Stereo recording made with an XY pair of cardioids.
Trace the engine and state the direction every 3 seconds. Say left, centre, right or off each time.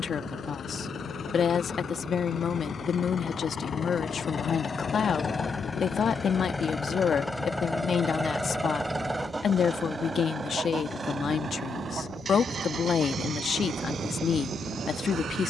left, left, centre, right, right.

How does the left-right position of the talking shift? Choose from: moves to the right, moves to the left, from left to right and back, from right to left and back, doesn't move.
doesn't move.